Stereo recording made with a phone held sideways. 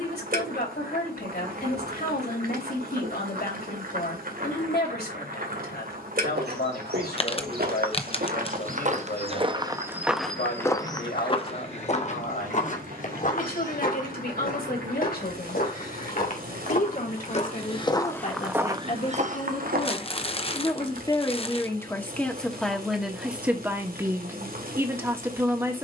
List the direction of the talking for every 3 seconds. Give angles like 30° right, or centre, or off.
70° left, 70° left, 70° left, 70° left, 70° left, 60° left, 40° left, centre, 20° right.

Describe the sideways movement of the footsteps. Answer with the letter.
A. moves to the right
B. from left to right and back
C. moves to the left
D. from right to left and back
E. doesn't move
D.